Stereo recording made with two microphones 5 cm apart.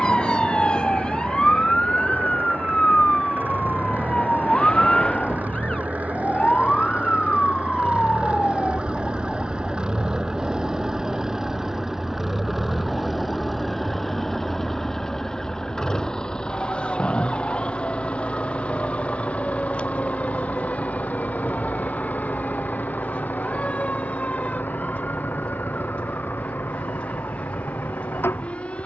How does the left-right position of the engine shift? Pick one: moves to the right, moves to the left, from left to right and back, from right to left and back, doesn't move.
moves to the left.